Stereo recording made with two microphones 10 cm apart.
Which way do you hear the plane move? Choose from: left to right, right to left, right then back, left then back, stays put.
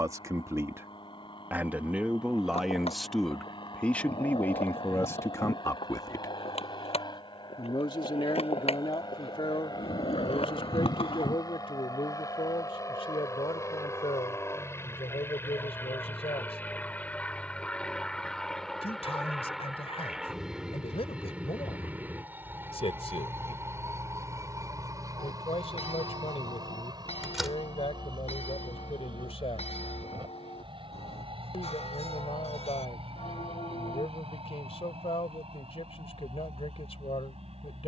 left to right.